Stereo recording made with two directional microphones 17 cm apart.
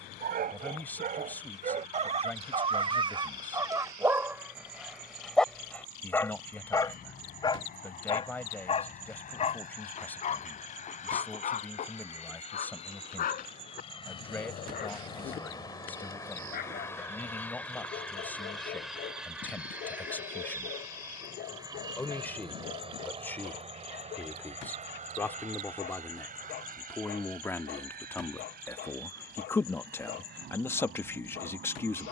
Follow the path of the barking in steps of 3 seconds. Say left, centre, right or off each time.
right, centre, left, left, left, left, left, left, left, left, left.